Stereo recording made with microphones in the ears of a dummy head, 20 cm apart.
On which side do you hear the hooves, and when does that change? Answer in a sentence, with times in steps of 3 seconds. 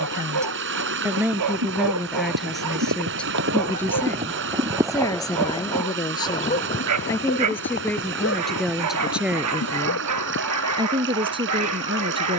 In this clip you hear the hooves on the right from 0 s and on the left from 6 s.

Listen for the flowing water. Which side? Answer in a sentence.
In this clip you hear the flowing water on the right.